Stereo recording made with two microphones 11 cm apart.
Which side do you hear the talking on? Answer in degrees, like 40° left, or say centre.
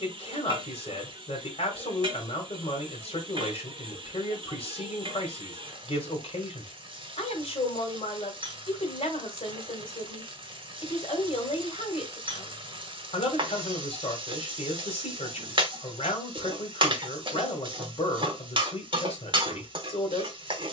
60° left.